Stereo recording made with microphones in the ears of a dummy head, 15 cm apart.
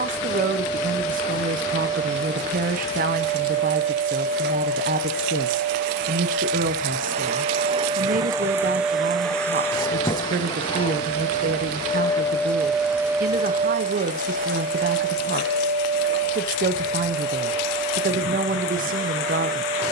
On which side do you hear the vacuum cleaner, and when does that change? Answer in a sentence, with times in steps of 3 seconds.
You can hear the vacuum cleaner on the right from 0 s, on the left from 9 s and on the right from 12 s.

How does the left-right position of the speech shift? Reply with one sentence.
You can hear the speech stay in one place.